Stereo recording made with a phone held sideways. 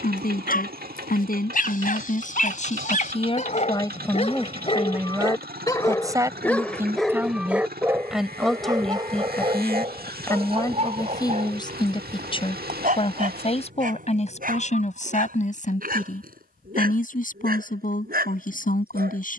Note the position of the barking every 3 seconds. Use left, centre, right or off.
left, left, centre, right, right, right, right.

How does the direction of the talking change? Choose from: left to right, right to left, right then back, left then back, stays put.
right then back.